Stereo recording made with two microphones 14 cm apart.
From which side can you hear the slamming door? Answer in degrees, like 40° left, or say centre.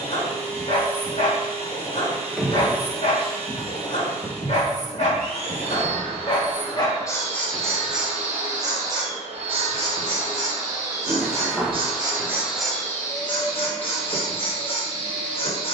centre.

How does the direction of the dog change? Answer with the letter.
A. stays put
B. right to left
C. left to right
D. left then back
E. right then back
E.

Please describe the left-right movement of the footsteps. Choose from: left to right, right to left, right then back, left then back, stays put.
left then back.